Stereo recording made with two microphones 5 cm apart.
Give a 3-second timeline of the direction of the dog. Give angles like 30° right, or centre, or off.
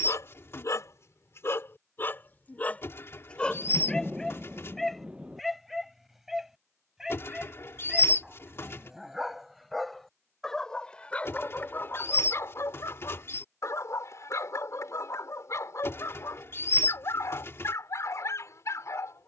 50° left, 10° left, 10° right, 10° left, 60° left, 70° left, 70° left.